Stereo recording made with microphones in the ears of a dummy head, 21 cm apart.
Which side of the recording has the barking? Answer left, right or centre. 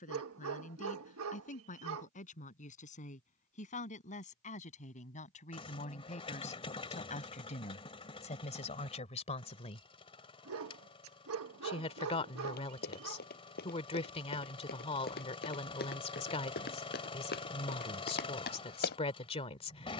right.